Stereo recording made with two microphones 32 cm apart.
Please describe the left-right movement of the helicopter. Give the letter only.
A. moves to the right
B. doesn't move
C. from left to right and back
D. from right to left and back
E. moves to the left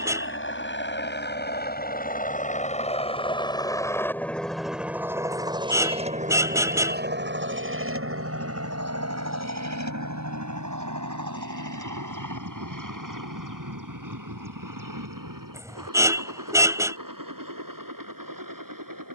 A.